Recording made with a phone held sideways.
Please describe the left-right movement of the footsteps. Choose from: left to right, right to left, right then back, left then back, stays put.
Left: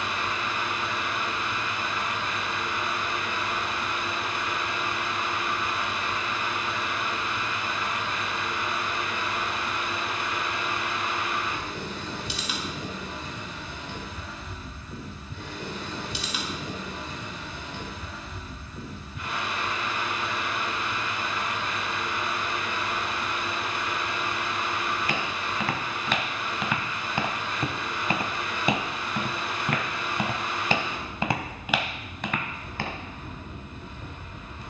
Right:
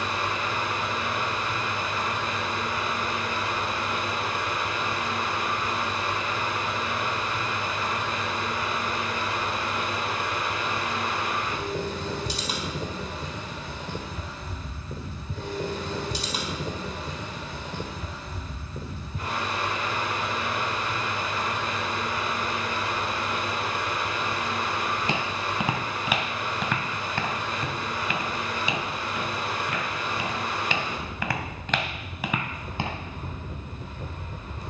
left then back.